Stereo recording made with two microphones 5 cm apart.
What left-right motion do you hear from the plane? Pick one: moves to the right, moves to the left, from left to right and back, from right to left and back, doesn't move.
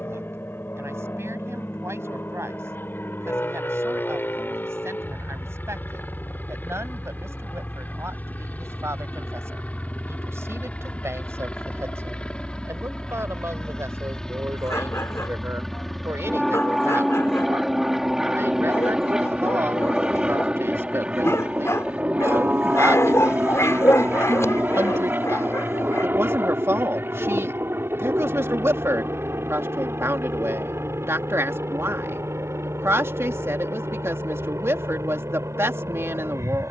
moves to the right.